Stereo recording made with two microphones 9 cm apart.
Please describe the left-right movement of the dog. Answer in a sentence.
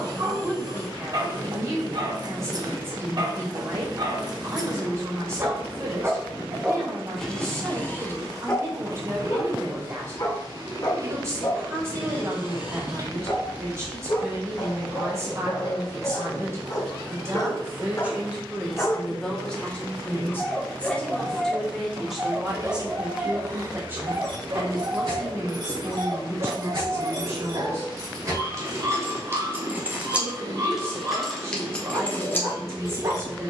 You can hear the dog move from right to left and back again.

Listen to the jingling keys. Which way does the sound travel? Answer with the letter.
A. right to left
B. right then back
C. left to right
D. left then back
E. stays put
A.